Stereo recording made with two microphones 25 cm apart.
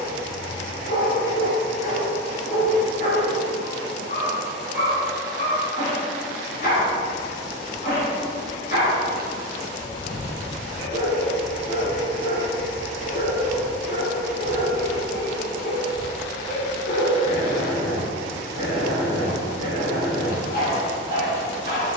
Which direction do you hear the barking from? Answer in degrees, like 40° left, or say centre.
40° left.